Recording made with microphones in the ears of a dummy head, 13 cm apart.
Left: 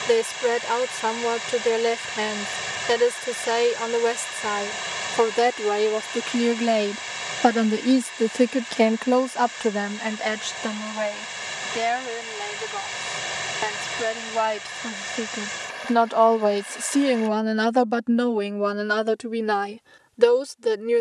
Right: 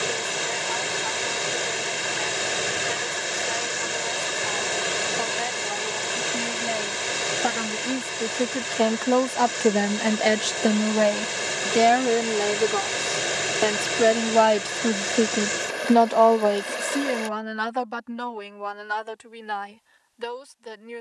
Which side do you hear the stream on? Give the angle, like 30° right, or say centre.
70° right.